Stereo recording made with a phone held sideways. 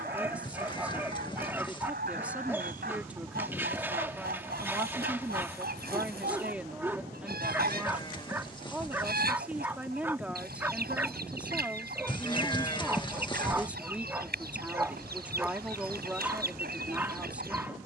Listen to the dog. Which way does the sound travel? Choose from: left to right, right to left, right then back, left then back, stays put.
stays put.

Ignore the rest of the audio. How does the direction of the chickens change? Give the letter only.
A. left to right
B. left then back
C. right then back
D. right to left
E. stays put
E.